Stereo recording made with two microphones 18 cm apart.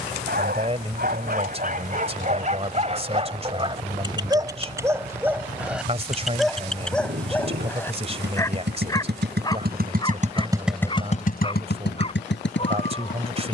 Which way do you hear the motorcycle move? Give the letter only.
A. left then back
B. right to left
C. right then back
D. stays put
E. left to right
B.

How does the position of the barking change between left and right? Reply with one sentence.
You can hear the barking go from the right side to the left.